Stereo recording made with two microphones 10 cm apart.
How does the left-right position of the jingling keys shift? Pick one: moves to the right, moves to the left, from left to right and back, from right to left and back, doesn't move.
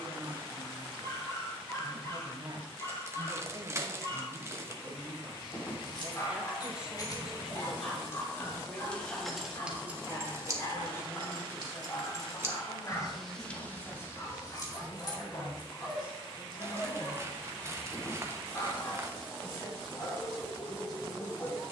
from left to right and back.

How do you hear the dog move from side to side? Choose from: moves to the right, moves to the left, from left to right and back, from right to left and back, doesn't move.
doesn't move.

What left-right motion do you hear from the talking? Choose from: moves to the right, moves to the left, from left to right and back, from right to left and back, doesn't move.
moves to the left.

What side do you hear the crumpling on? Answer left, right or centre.
right.